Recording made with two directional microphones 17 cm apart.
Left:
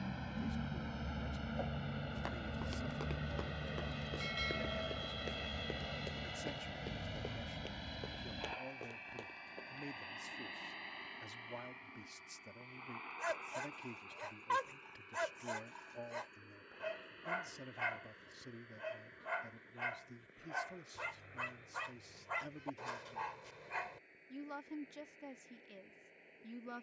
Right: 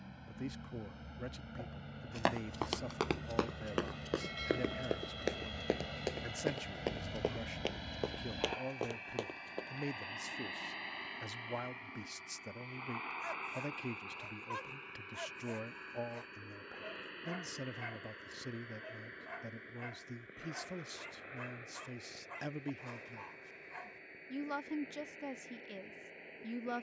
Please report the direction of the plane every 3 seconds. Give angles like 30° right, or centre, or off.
40° left, 10° left, 10° right, 30° right, 40° right, 50° right, 50° right, 60° right, 60° right.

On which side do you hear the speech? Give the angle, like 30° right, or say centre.
40° right.